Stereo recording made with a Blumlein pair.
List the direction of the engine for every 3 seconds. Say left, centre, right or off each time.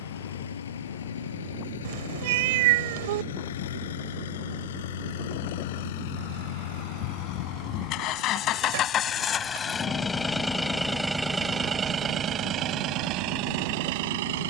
left, left, left, centre, right.